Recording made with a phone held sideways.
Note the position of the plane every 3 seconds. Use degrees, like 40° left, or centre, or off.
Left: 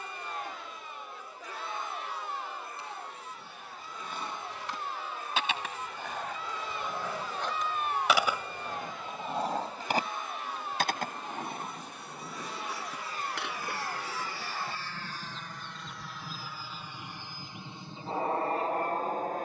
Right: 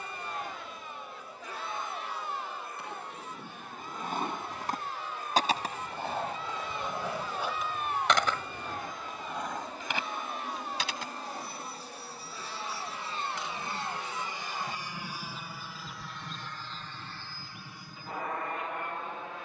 60° right, 50° right, 50° right, 40° right, 30° right, 10° left, 40° left.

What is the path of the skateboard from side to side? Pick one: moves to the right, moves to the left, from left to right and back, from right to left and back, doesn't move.
moves to the left.